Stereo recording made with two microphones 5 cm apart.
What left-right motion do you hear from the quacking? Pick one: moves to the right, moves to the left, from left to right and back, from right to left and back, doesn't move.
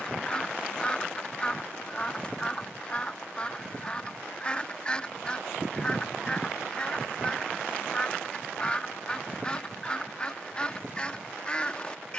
doesn't move.